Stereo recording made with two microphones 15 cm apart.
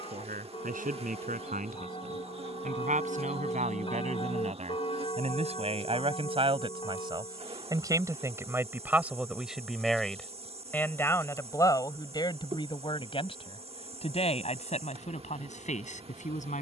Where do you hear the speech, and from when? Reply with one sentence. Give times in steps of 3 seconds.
In this clip you hear the speech on the right from 0 s, in the centre from 9 s and on the left from 12 s.